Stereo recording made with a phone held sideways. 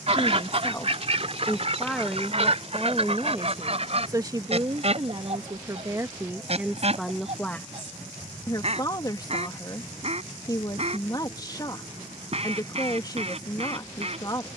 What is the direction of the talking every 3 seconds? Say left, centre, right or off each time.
centre, right, centre, left, left.